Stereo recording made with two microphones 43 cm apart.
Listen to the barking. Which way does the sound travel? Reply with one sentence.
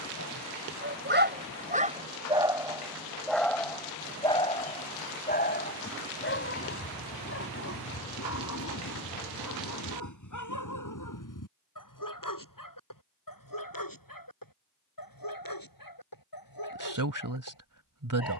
You can hear the barking move to the left.